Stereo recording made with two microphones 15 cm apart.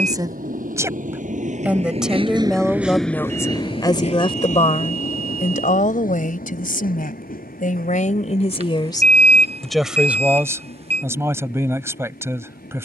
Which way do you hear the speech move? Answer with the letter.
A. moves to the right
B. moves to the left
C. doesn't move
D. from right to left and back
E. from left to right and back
D.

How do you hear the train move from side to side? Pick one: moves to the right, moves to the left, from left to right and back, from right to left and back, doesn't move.
moves to the left.